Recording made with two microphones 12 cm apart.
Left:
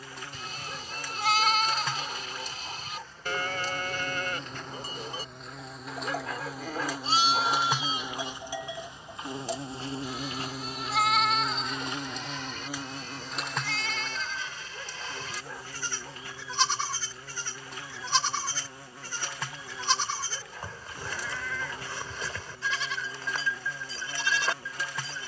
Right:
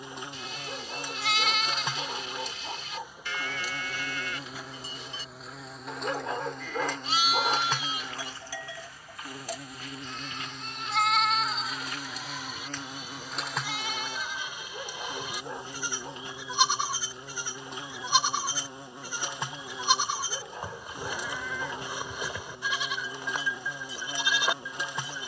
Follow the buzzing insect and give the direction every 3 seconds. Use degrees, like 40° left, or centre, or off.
20° right, 10° right, 10° left, 30° left, centre, 20° right, 20° right, 20° right, 20° right.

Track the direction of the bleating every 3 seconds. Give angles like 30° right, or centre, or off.
50° left, 50° left, 30° left, centre, 10° right, 10° right, 10° right, 10° right, 10° right.